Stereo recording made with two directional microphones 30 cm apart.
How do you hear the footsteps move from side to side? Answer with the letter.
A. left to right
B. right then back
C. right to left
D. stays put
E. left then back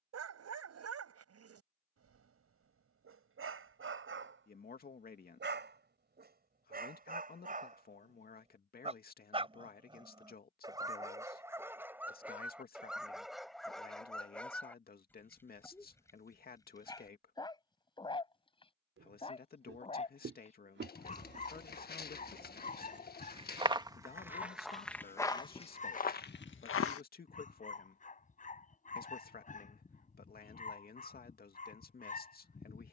C.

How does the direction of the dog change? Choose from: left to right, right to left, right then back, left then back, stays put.
right to left.